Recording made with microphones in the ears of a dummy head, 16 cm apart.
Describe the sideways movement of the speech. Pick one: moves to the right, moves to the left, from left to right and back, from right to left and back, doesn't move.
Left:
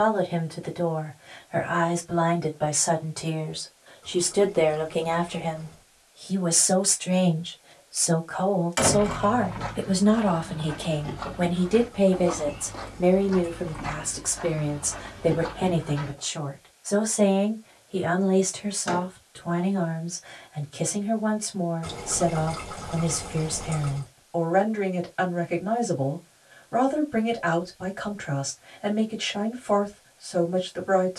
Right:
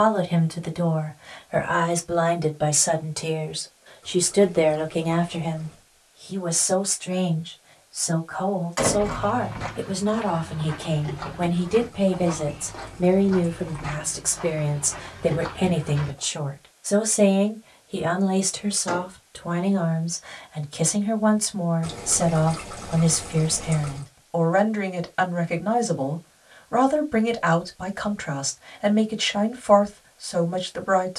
from right to left and back.